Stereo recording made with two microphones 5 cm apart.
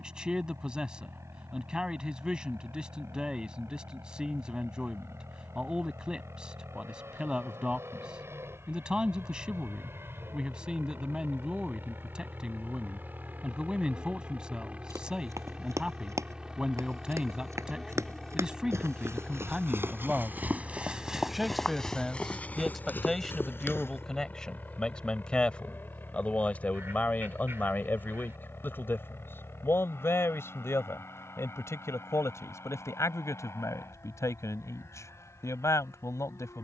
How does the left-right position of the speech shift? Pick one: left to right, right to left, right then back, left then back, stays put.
right to left.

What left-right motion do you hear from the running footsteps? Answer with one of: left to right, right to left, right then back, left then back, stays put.
right to left.